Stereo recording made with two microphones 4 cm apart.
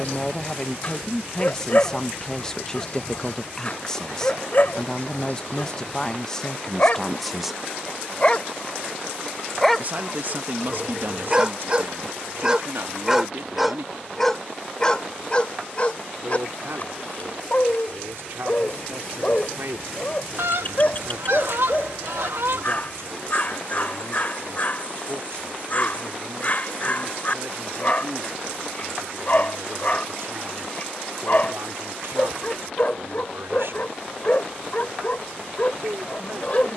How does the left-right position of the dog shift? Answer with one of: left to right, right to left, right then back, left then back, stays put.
right then back.